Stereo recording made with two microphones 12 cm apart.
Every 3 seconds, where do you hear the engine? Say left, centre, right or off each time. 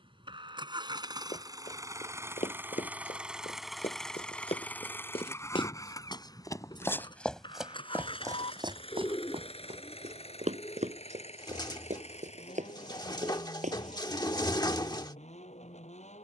right, centre, left, left, left, left.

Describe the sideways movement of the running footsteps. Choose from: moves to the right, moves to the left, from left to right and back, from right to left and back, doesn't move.
moves to the right.